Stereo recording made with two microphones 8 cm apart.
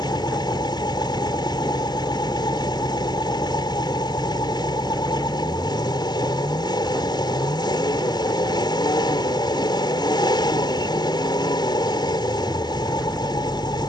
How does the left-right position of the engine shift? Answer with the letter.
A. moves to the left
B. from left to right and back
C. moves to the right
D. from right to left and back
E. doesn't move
E.